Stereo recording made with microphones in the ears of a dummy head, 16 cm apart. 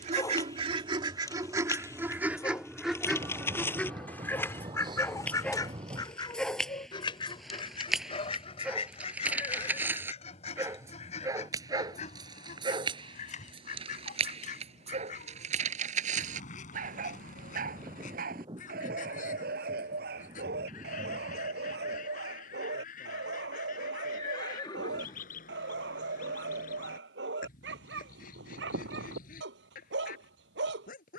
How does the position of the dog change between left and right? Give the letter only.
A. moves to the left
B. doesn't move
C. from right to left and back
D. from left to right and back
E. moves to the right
E.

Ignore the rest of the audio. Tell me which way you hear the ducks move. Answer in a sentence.
In this clip you hear the ducks travel towards the left.